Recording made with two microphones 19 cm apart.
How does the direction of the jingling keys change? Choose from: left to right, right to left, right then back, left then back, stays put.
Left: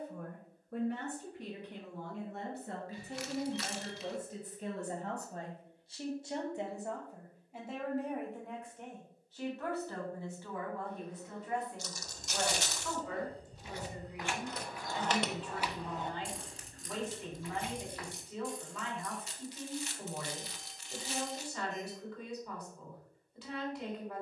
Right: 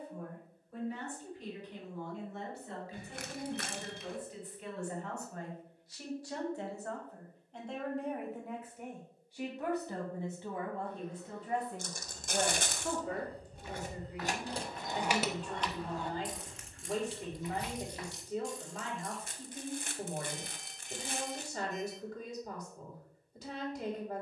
right to left.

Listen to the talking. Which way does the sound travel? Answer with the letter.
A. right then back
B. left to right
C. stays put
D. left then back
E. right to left
B.